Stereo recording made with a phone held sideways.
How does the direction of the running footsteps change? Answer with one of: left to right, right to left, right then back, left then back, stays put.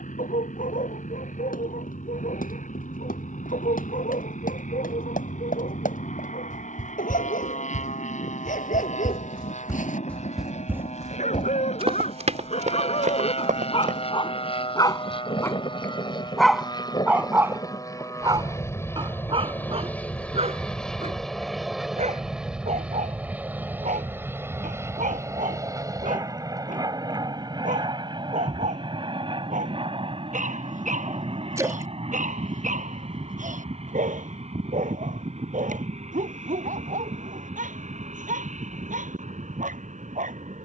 left to right.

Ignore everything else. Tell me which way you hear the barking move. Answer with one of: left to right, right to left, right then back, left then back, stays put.
left to right.